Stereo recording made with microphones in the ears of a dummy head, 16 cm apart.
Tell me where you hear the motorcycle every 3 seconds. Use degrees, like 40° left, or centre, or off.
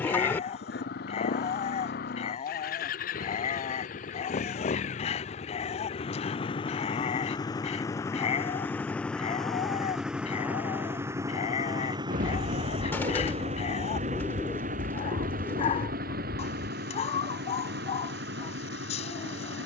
50° left, 40° left, 20° left, 10° right, 30° right, 50° right, 60° right.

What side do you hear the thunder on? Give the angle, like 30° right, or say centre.
50° right.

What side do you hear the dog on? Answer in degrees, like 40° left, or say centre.
40° left.